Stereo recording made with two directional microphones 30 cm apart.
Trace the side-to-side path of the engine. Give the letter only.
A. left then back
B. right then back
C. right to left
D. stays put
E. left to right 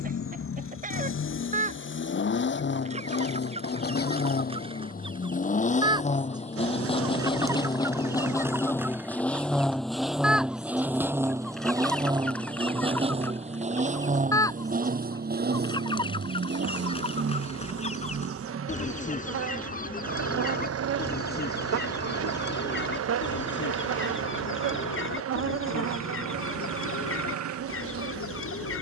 E.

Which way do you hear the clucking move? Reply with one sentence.
In this clip you hear the clucking go from the right side to the left.